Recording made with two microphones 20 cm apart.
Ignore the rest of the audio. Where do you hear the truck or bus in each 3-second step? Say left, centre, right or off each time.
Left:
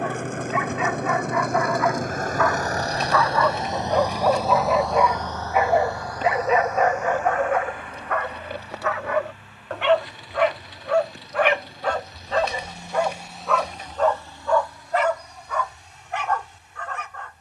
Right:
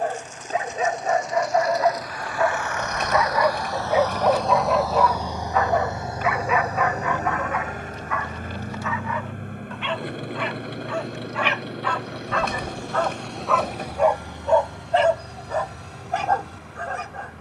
left, centre, right, right, right, right.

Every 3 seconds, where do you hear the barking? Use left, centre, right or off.
right, centre, left, left, centre, right.